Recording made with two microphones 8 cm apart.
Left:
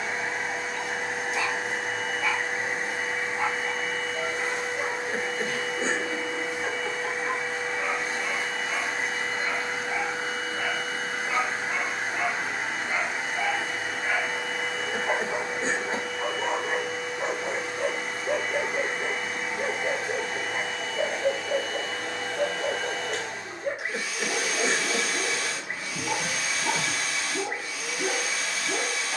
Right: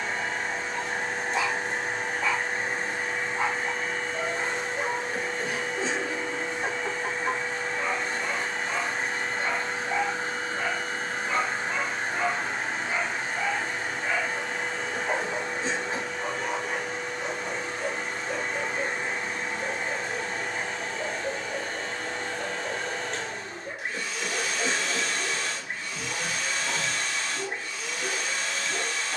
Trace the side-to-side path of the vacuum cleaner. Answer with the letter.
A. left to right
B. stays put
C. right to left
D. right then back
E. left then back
B.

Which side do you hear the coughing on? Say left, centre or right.
left.